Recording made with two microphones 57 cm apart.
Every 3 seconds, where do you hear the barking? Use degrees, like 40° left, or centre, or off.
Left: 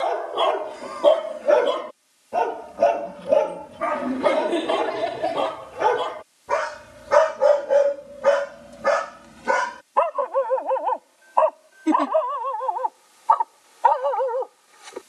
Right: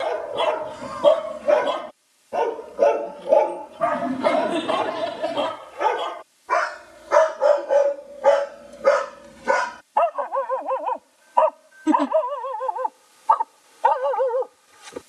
20° right, 60° left, 40° left, 20° right, 50° right.